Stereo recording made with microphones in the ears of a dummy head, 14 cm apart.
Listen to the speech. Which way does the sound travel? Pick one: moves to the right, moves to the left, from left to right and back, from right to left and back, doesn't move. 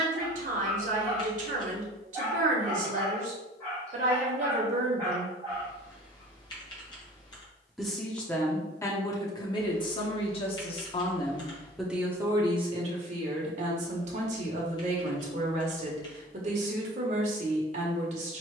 from right to left and back.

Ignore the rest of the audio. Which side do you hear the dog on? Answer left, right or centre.
centre.